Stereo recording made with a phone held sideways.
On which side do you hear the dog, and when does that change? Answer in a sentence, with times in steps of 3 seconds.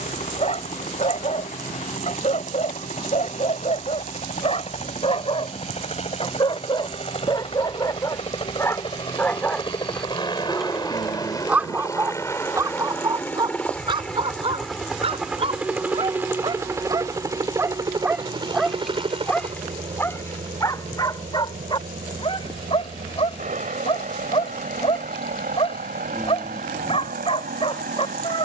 You can hear the dog on the left from 0 s, in the centre from 9 s, on the right from 12 s, in the centre from 18 s and on the left from 21 s.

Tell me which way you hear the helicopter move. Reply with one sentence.
You can hear the helicopter travel towards the right.